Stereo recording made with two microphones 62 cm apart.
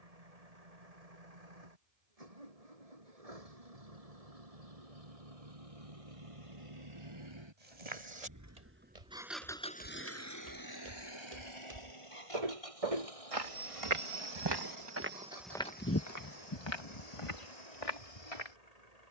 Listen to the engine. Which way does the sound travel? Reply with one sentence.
In this clip you hear the engine move to the left.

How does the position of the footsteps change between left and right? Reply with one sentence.
In this clip you hear the footsteps travel towards the left.